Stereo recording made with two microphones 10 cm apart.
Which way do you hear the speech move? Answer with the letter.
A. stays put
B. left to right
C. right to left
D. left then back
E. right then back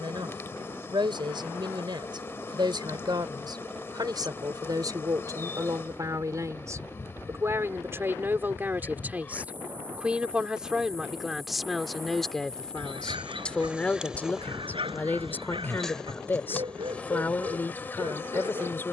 C.